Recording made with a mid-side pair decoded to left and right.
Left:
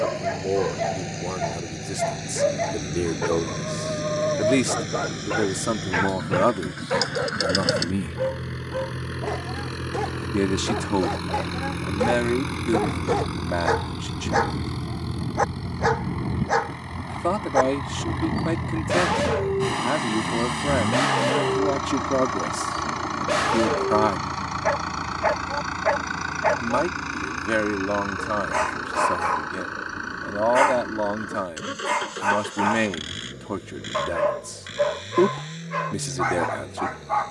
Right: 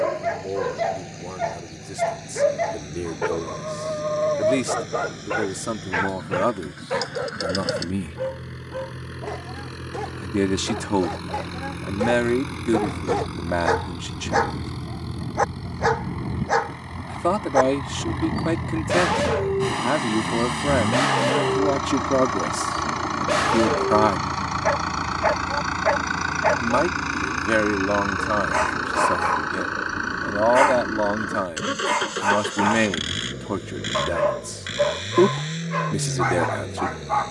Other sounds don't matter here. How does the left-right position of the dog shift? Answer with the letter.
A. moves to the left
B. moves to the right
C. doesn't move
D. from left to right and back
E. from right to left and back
E.